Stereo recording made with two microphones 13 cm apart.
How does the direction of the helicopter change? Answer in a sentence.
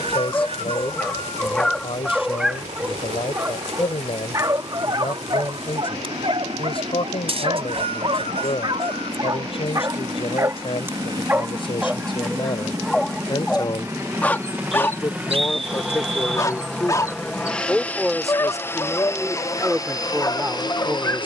In this clip you hear the helicopter move to the left.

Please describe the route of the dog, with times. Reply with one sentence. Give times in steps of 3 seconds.
You can hear the dog in the centre from 0 s, on the right from 3 s, in the centre from 12 s and on the left from 15 s.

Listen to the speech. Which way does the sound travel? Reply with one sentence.
In this clip you hear the speech move from left to right.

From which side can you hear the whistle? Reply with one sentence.
You can hear the whistle on the right.